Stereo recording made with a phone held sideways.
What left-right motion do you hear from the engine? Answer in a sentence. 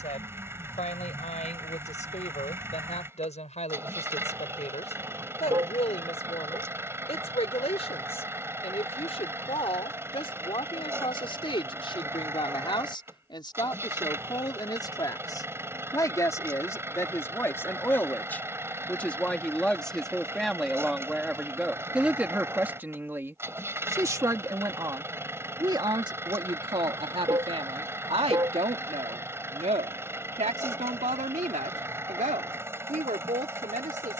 In this clip you hear the engine stay in one place.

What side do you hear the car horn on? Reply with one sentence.
In this clip you hear the car horn on the right.